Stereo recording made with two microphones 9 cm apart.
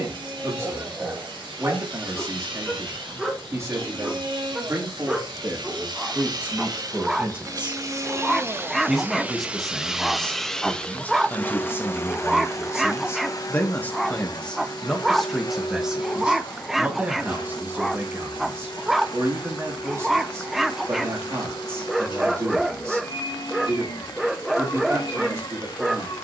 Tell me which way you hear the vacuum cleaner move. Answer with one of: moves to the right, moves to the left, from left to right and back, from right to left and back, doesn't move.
moves to the left.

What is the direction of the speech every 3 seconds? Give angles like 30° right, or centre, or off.
30° right, 30° right, 20° right, 10° left, 20° left, 10° right, 30° right, 30° right, 30° right.